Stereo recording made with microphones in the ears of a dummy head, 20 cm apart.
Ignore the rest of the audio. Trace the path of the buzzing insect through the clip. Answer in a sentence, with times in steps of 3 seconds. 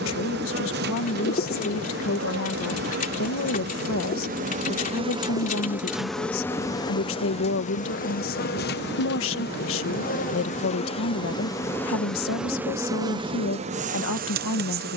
You can hear the buzzing insect on the right from 0 s, on the left from 6 s and on the right from 12 s.